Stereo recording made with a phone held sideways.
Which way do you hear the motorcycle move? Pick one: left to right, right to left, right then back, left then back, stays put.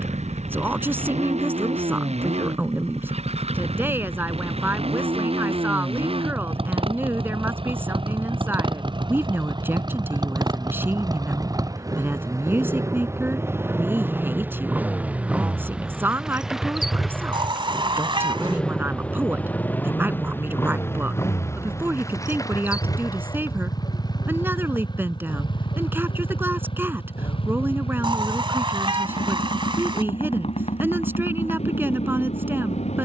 right to left.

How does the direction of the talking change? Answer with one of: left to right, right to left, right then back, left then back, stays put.
stays put.